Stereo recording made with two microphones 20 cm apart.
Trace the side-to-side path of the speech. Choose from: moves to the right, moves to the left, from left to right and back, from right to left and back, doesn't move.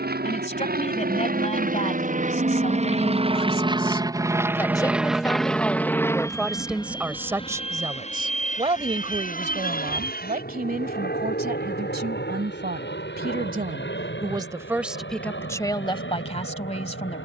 from left to right and back.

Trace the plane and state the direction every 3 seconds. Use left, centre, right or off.
right, centre, left, left, left, left.